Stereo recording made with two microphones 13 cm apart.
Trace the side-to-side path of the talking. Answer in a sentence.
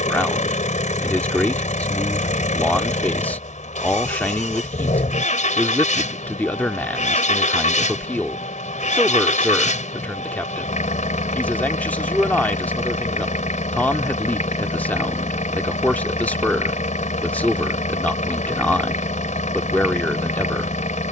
In this clip you hear the talking stay in one place.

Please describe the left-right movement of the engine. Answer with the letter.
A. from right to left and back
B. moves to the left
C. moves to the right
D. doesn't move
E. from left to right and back
D.